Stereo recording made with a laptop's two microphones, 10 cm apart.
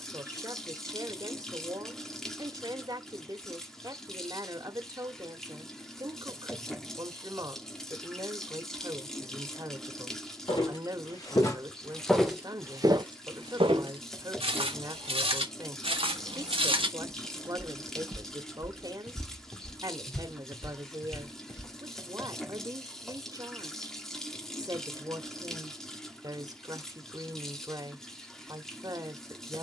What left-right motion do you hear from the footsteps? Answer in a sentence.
In this clip you hear the footsteps go right and come back.